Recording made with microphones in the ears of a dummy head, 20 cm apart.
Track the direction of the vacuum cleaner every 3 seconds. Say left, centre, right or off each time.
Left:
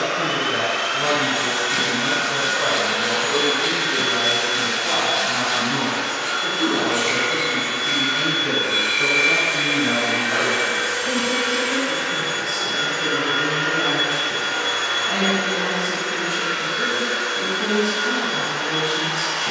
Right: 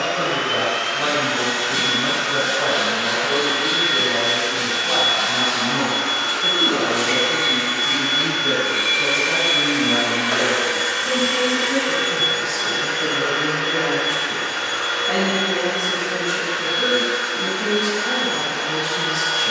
left, left, right, right, centre, left, left.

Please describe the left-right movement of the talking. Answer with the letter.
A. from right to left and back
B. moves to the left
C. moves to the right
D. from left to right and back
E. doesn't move
A.